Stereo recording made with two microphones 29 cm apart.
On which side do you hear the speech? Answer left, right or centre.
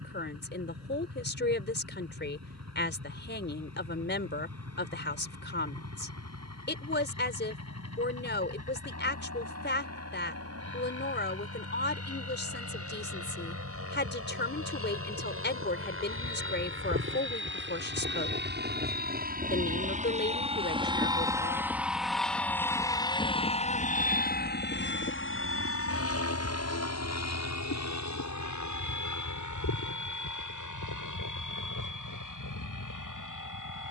left.